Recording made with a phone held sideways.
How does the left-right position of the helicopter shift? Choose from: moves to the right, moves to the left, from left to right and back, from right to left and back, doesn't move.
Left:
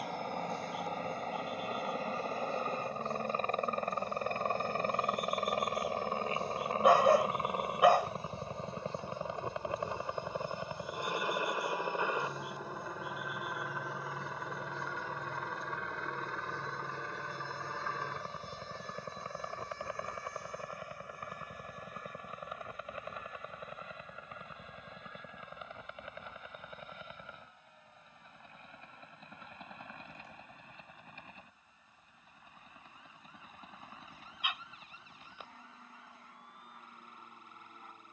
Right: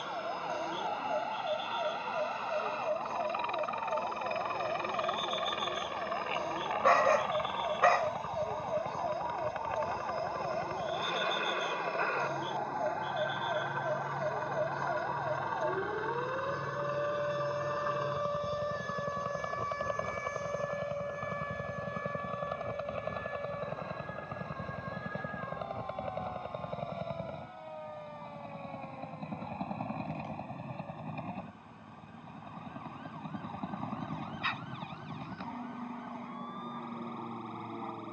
moves to the right.